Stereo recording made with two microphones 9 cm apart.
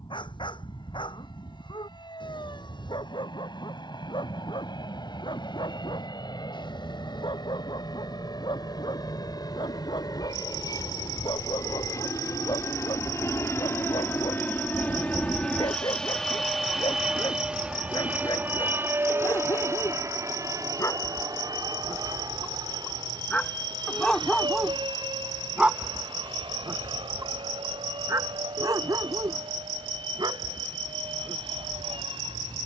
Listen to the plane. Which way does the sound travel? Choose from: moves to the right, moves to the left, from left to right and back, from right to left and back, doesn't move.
moves to the right.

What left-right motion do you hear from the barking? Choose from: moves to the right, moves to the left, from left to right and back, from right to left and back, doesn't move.
moves to the right.